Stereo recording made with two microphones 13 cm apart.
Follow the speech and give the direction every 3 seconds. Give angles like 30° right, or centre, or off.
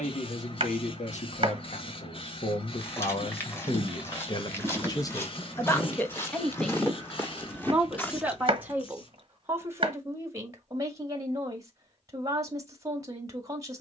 70° left, 40° left, centre, 20° right, 30° right.